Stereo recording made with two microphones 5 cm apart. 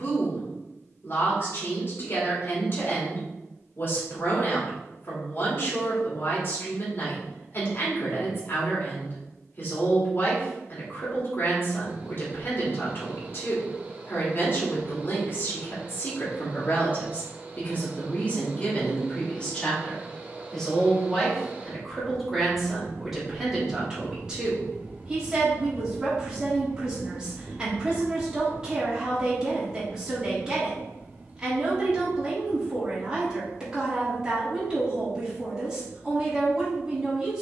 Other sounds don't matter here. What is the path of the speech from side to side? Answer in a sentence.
You can hear the speech move to the right.